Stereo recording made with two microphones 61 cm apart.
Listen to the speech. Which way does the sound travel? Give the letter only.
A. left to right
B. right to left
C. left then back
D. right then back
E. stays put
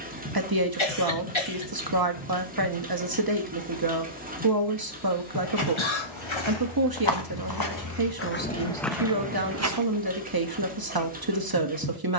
E.